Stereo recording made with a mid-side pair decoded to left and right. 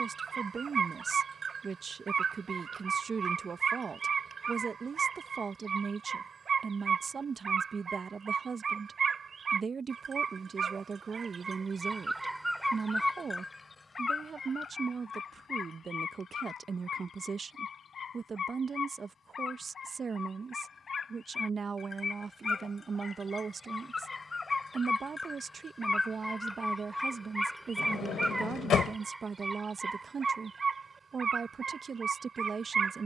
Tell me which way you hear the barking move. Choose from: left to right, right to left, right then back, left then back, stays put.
left then back.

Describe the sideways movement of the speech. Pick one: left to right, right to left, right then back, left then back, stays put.
stays put.